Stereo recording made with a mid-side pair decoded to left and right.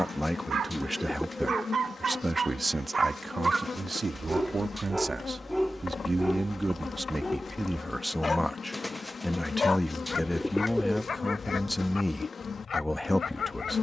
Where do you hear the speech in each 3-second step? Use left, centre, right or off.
centre, right, centre, centre, centre.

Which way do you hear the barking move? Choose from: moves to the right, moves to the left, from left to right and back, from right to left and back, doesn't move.
moves to the left.